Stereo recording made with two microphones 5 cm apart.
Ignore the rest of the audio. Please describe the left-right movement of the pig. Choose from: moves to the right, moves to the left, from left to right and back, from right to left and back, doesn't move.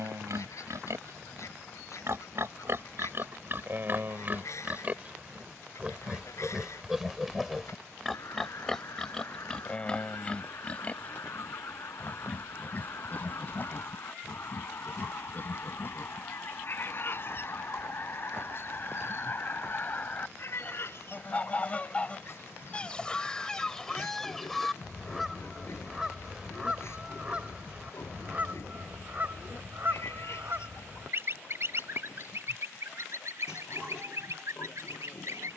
moves to the left.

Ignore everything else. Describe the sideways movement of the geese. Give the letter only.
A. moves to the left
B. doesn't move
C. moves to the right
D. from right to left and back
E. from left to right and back
C.